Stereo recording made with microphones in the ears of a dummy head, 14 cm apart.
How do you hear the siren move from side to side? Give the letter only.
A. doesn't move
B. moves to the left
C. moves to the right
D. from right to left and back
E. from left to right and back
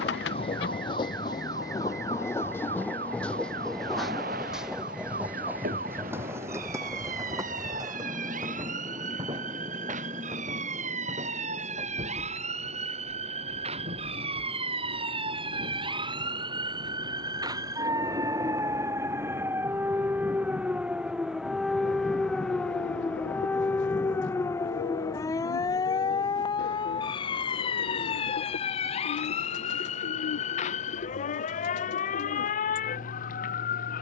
B.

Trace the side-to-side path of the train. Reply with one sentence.
In this clip you hear the train go from the left side to the right.